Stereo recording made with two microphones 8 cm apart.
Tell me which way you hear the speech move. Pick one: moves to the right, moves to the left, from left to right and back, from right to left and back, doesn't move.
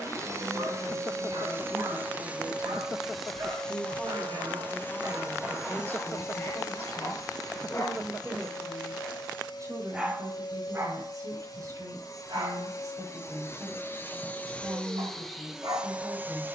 from right to left and back.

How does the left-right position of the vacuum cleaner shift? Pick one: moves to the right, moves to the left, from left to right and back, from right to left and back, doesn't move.
from right to left and back.